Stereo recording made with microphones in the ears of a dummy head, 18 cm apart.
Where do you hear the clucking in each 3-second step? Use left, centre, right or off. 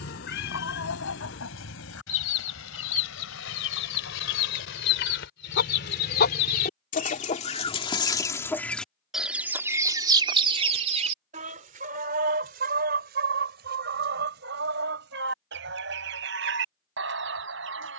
left, left, left, right, right, right.